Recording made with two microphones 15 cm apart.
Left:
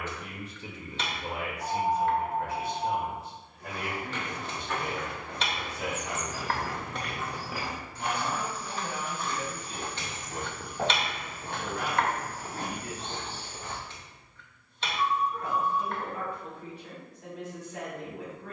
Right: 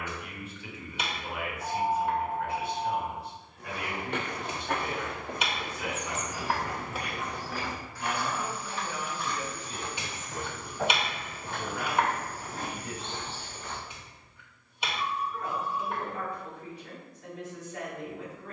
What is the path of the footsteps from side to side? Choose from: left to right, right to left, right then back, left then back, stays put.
right to left.